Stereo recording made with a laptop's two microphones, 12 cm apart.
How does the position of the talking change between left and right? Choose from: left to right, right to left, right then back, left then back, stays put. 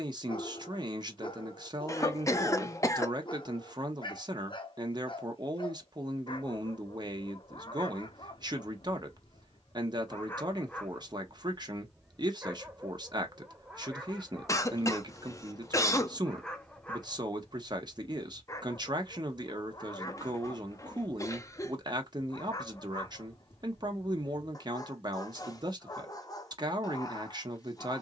stays put.